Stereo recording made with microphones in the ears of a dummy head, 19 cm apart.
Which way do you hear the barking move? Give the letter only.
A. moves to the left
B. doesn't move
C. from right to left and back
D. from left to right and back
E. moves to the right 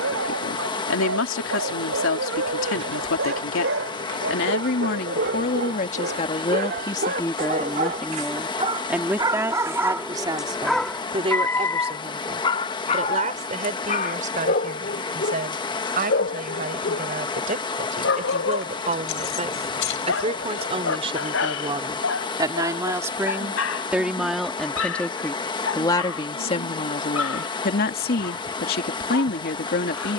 A.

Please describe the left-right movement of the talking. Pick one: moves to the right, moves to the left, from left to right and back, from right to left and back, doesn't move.
from left to right and back.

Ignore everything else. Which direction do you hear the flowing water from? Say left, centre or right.
left.